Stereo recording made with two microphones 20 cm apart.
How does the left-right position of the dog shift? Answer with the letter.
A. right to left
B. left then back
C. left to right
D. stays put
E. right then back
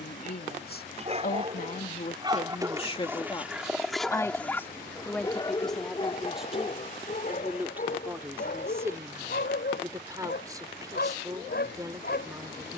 A.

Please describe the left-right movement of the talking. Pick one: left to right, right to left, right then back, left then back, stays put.
left to right.